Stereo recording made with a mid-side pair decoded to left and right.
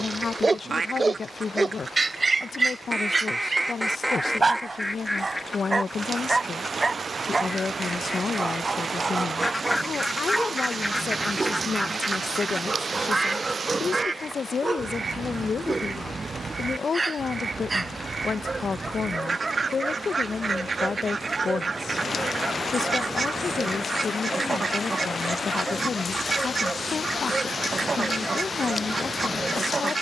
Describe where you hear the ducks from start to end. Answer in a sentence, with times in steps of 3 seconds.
In this clip you hear the ducks on the right from 0 s, in the centre from 3 s, not at all from 6 s, in the centre from 9 s and on the right from 12 s.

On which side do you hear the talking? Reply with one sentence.
You can hear the talking on the left.